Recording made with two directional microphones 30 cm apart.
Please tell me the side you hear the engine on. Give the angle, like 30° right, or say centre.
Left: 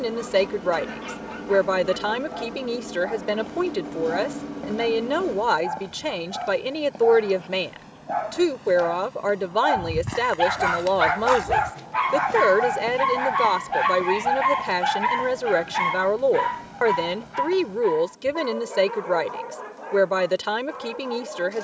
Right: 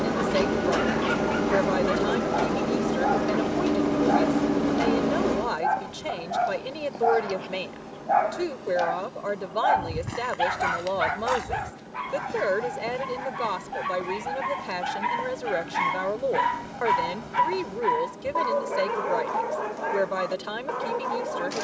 60° right.